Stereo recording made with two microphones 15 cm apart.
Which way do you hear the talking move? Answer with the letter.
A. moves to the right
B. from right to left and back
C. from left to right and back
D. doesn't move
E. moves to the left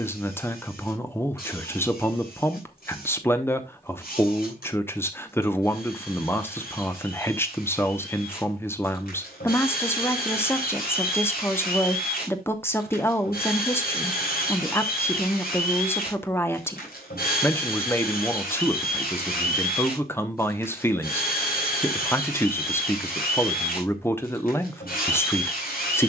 D.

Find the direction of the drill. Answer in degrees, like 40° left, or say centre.
80° left.